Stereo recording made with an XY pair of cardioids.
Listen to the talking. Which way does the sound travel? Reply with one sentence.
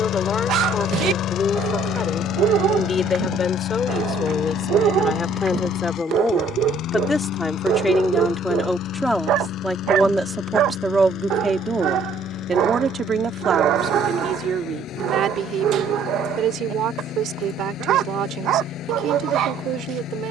You can hear the talking go from the left side to the right.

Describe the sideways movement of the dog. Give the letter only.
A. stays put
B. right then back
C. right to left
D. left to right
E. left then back
A.